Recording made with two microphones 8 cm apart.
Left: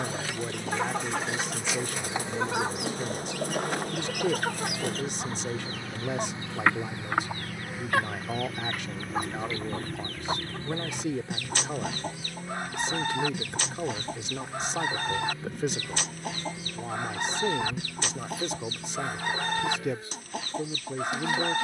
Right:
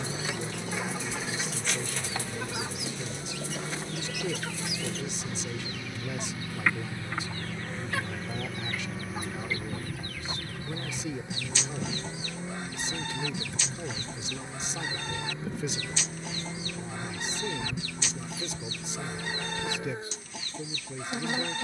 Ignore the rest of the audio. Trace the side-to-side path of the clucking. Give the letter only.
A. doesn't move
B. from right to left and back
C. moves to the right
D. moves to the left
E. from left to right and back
A.